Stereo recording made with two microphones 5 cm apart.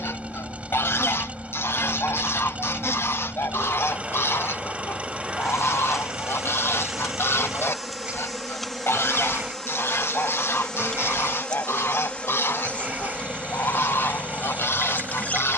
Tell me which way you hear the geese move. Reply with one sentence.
In this clip you hear the geese stay put.